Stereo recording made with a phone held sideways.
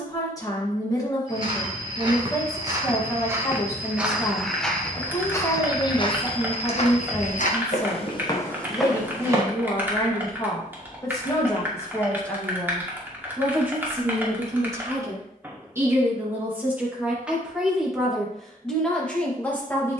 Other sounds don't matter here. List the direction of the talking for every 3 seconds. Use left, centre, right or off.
left, left, left, left, centre, centre, centre.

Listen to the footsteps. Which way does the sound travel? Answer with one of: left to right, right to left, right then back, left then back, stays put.
left then back.